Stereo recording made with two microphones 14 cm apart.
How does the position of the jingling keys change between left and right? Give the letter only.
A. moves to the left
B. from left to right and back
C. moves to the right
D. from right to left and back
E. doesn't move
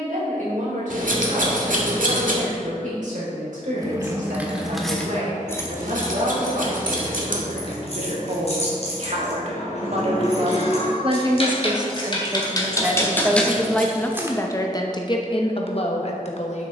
D.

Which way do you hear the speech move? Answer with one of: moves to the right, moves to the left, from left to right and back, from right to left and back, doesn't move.
moves to the left.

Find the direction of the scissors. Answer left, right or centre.
right.